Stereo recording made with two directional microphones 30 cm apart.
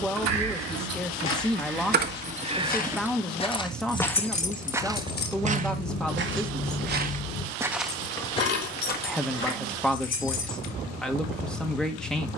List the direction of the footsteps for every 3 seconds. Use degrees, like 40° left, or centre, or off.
40° left, centre, 10° right, 40° left.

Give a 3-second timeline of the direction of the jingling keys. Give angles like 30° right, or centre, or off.
40° right, 30° left, 50° left, 60° left.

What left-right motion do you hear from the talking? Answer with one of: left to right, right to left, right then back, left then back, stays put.
stays put.